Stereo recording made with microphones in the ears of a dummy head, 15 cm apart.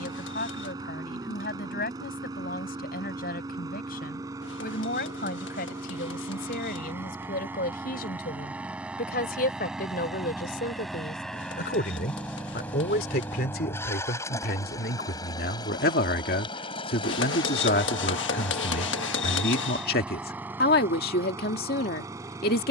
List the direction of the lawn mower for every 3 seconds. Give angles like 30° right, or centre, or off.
20° right, 20° right, 10° right, centre, 10° left, 20° left, centre, 20° right.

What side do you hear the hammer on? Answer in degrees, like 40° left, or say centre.
80° left.